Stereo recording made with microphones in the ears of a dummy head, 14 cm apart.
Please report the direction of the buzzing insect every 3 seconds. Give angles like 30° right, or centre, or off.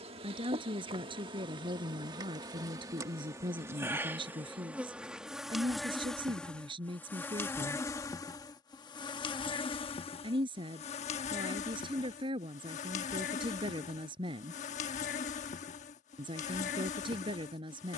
30° right, 10° right, 10° left, 40° left, 50° left, 50° left.